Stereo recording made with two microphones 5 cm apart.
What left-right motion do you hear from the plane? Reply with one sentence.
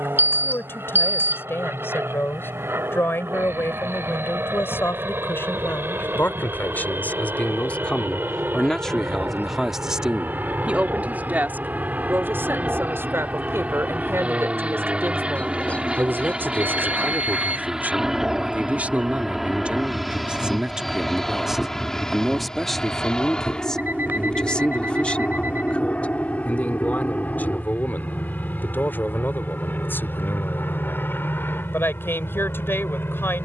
In this clip you hear the plane move from right to left.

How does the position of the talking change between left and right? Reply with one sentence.
In this clip you hear the talking move from left to right and back again.